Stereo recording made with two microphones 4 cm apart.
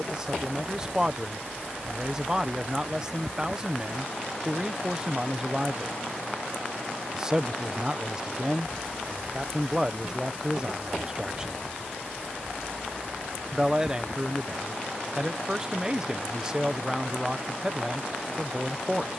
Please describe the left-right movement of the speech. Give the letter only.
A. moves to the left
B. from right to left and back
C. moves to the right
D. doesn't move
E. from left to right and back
D.